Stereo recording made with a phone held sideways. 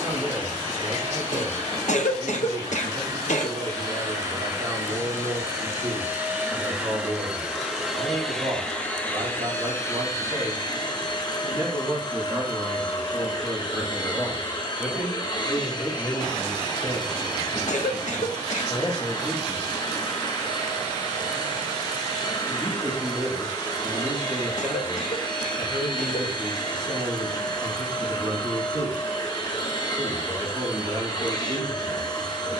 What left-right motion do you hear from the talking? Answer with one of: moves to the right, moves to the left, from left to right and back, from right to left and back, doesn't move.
from right to left and back.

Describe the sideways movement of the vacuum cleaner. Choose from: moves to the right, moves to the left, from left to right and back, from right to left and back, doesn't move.
moves to the left.